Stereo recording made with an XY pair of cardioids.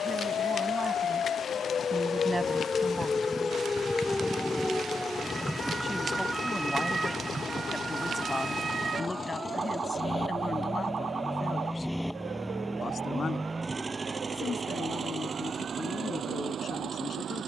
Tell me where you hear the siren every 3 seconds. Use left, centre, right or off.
left, centre, right, right, right, right.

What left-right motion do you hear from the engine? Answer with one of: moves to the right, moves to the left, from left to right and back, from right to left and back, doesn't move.
moves to the right.